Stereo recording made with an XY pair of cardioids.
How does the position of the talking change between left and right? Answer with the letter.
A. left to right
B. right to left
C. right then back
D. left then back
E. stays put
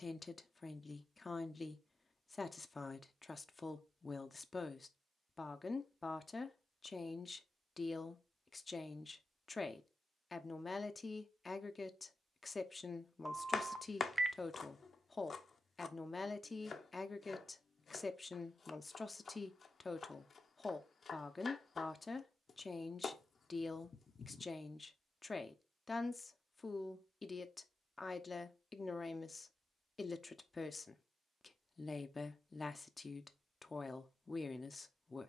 E.